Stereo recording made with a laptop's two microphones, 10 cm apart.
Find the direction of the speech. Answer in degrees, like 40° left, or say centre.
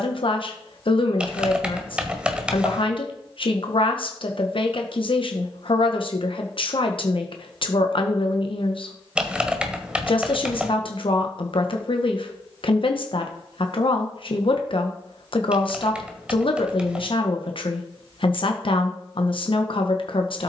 60° left.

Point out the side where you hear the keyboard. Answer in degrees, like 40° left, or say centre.
10° right.